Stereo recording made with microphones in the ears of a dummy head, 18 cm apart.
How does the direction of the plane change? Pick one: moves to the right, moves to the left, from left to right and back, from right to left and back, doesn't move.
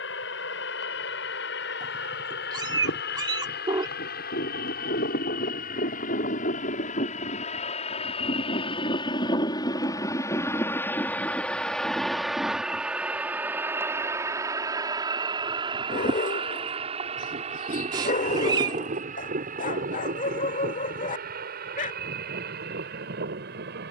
moves to the right.